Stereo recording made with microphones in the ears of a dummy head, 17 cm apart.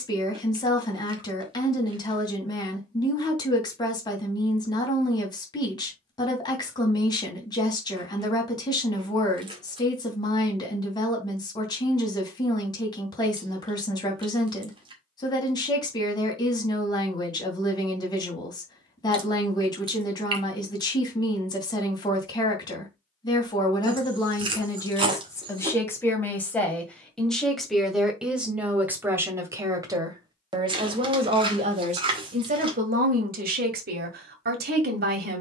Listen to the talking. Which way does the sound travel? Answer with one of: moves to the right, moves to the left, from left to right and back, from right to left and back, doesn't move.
moves to the right.